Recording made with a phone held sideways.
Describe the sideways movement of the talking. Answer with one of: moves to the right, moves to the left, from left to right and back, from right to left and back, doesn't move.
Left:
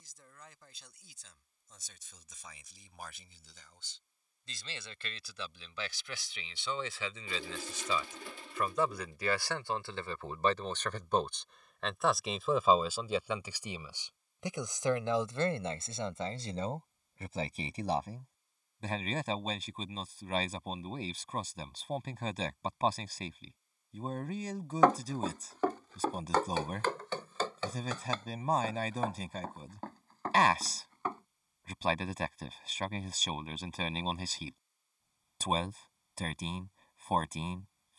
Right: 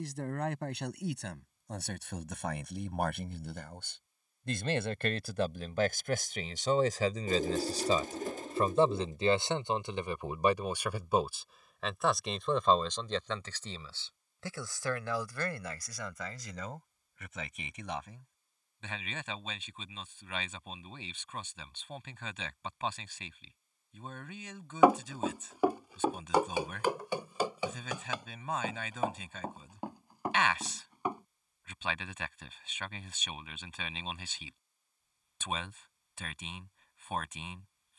moves to the left.